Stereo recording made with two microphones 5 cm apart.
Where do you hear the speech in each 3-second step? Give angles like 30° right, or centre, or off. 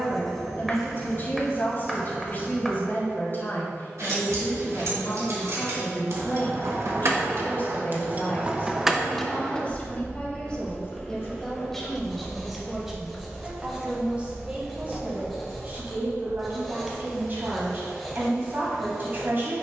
40° left, 40° left, 40° left, 20° left, 10° right, 40° right, 40° right.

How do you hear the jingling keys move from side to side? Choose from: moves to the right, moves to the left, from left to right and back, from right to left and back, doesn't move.
from right to left and back.